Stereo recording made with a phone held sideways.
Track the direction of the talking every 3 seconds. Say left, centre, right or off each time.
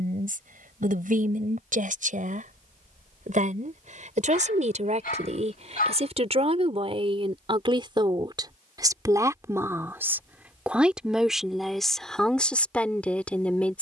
right, right, right, centre, centre.